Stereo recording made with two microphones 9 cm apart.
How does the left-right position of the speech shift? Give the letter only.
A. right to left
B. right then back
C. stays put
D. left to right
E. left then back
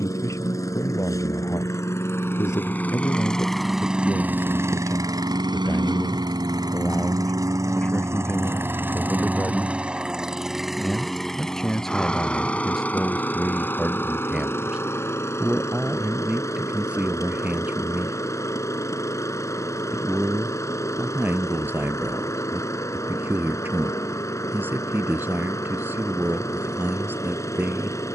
D.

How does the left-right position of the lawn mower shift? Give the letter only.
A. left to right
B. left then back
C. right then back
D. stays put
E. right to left
C.